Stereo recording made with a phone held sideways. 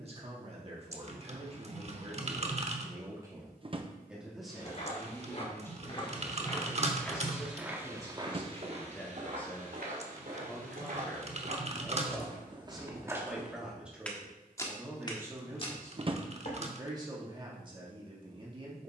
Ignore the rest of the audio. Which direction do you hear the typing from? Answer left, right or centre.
right.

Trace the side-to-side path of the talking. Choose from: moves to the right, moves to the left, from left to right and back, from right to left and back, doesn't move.
from right to left and back.